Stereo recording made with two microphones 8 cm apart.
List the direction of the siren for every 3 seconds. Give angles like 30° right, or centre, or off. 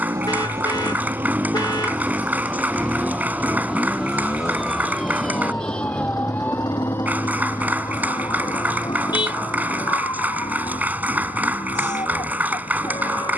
40° right, centre, 30° left, 50° left, 60° left.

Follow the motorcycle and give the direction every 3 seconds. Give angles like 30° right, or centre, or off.
20° right, 30° left, 60° left, 70° left, 70° left.